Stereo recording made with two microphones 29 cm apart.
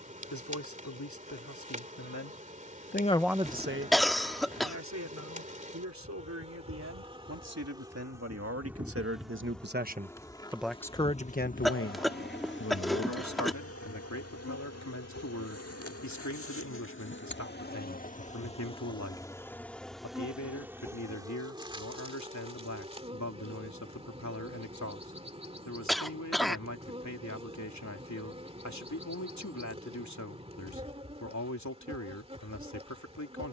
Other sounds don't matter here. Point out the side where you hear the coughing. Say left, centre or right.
centre.